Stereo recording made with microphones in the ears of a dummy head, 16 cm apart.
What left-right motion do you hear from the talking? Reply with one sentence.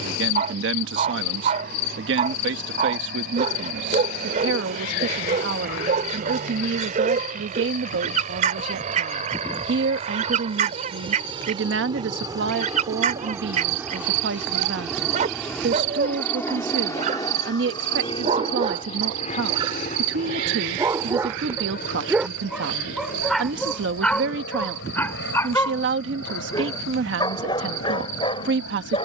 In this clip you hear the talking stay put.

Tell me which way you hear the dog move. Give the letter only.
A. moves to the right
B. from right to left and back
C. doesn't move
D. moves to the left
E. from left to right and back
D.